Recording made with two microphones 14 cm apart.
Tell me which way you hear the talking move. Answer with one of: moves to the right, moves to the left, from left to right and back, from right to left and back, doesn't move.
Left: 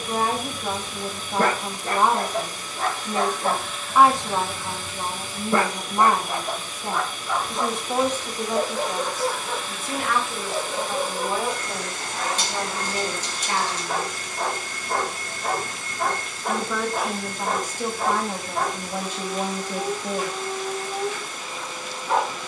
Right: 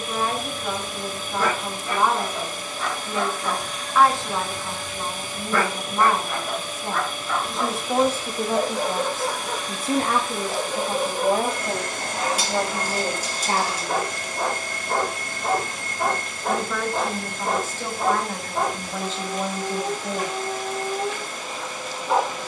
from left to right and back.